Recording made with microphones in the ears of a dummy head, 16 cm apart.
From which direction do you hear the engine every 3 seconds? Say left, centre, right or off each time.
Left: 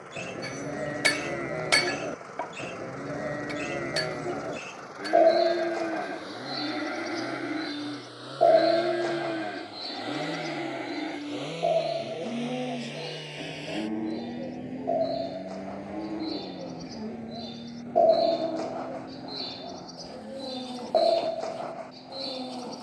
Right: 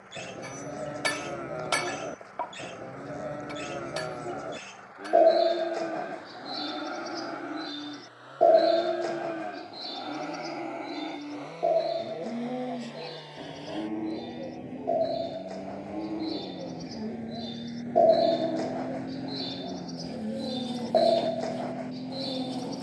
left, left, left, left, left, centre, right, right.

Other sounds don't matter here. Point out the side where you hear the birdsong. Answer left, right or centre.
centre.